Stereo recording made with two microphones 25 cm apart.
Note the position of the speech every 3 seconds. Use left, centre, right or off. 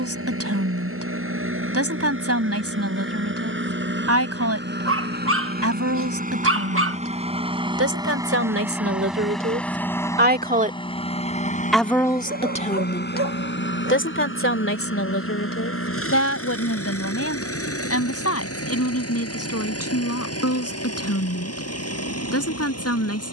right, right, right, right, left, left, left, left.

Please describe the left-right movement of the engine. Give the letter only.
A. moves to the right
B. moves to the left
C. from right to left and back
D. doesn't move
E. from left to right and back
B.